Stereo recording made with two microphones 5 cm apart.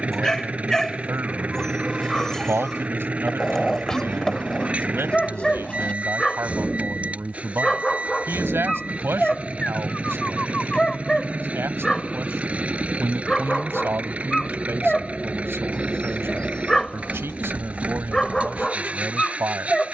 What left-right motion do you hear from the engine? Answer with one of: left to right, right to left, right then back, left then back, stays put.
stays put.